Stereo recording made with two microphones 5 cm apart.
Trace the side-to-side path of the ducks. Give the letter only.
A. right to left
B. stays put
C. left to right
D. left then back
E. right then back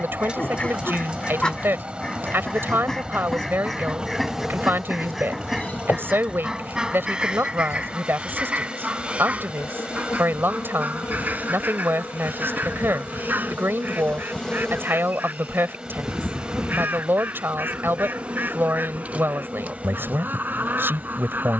C.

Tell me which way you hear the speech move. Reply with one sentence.
In this clip you hear the speech stay in one place.